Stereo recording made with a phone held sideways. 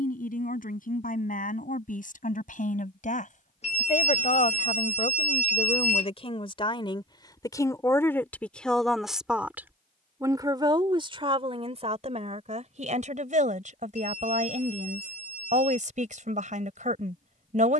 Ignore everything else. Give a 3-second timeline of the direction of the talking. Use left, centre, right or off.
left, left, left, right, right, right.